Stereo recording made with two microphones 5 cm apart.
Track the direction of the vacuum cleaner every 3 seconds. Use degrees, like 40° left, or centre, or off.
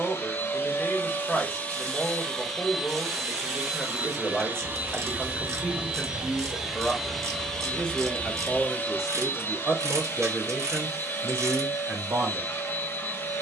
30° left, 20° right, 10° left, 40° left, 50° left.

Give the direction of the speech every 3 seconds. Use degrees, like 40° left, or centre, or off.
10° left, 10° left, 10° left, 20° right, 40° right.